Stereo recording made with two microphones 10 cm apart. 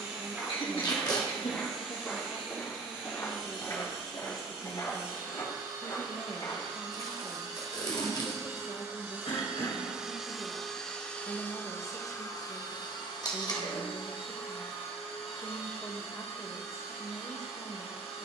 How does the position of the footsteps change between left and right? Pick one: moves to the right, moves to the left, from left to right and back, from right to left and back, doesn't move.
moves to the left.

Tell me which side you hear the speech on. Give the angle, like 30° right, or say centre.
30° left.